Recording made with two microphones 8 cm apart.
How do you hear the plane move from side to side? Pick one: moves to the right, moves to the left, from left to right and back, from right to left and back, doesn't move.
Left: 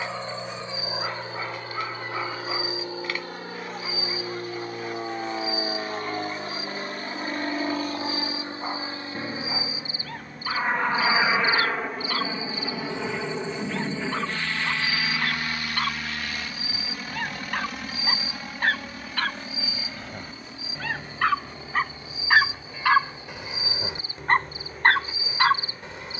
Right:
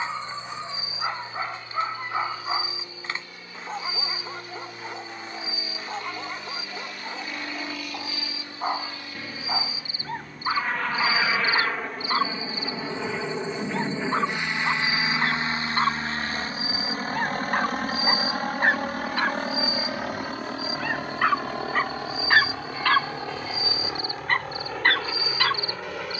moves to the right.